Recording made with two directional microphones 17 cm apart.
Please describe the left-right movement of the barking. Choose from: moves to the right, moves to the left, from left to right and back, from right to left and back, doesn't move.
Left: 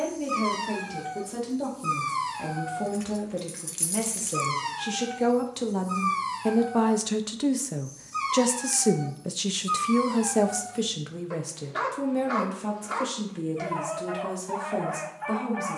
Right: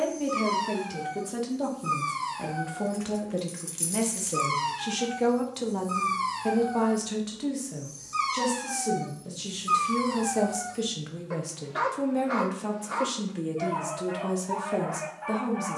from left to right and back.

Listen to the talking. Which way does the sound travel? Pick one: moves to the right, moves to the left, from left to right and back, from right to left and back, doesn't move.
from right to left and back.